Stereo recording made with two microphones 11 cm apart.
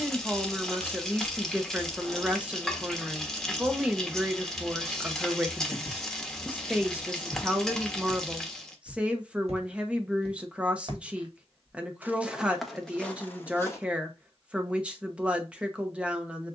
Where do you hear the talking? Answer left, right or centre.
centre.